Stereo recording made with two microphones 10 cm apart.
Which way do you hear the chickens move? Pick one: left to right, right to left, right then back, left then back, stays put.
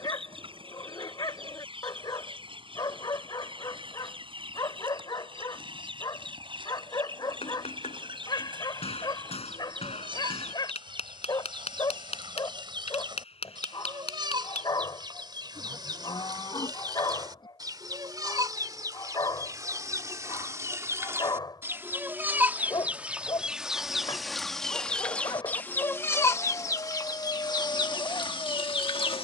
right to left.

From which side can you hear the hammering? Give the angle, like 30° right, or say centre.
80° left.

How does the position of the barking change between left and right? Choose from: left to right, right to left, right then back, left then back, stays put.
stays put.